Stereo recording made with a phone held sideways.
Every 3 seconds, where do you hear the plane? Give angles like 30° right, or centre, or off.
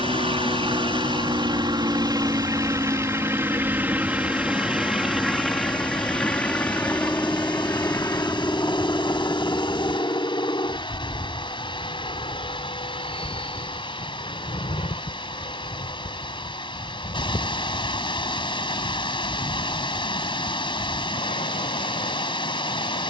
30° right, 10° right, 10° left, 30° left, 40° left, 40° left, 50° left, 50° left.